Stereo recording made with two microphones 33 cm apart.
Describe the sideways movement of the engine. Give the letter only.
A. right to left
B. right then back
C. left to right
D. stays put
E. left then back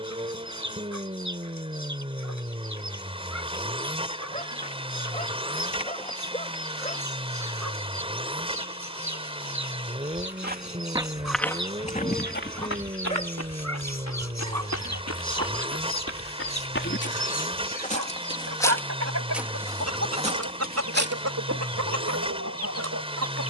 D.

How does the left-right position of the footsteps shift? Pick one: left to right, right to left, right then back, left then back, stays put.
left then back.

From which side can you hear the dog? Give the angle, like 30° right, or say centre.
20° left.